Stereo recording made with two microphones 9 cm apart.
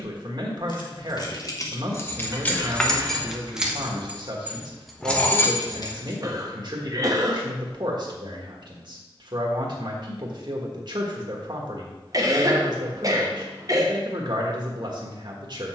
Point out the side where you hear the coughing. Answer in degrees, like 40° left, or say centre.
40° right.